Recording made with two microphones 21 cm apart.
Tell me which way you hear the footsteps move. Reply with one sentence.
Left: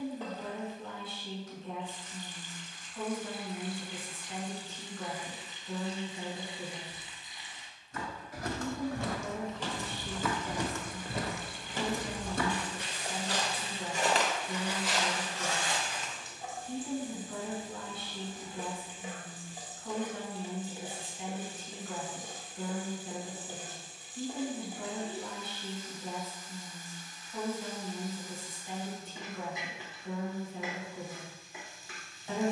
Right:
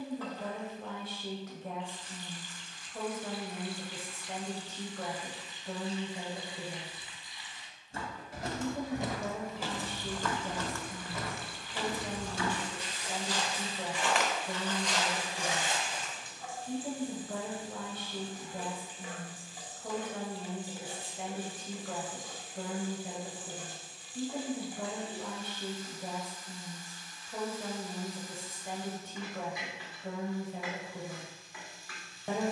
In this clip you hear the footsteps go left and come back.